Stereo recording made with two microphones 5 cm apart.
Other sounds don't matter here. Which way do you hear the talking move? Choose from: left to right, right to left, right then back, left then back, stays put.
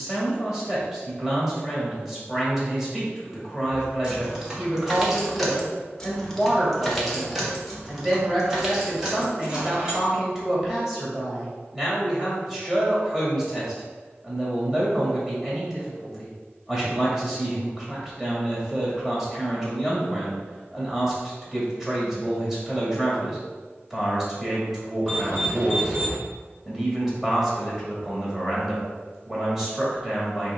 stays put.